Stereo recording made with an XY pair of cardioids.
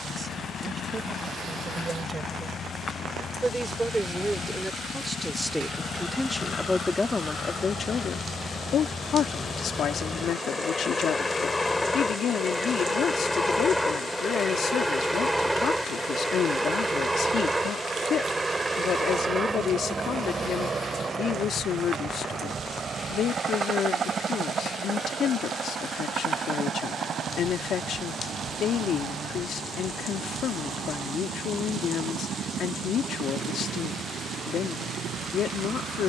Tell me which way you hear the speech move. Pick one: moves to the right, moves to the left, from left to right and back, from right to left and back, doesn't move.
moves to the left.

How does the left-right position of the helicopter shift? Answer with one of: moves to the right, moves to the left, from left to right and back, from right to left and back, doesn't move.
moves to the right.